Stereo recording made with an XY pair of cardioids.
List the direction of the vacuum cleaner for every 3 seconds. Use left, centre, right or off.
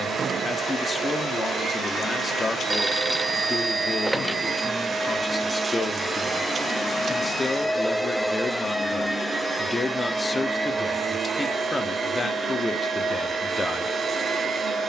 right, right, centre, right, right.